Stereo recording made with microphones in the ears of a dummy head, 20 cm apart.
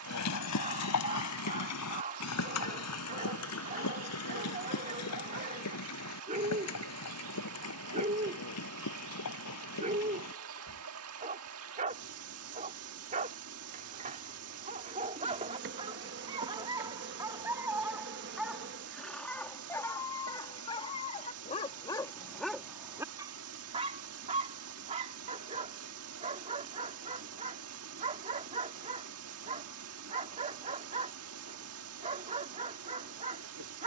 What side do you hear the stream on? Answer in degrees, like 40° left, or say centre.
70° right.